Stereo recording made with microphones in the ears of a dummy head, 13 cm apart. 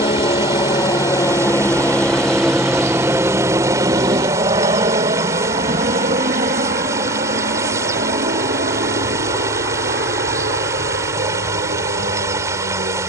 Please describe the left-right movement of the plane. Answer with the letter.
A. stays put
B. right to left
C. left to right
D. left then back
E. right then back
C.